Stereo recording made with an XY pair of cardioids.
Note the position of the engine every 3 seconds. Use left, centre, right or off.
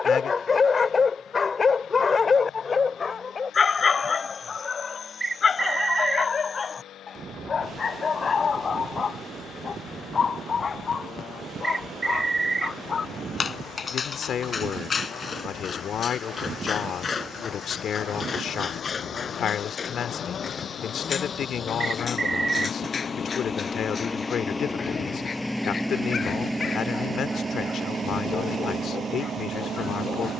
left, left, left, left, left, left, left, left, centre, right.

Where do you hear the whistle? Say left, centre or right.
right.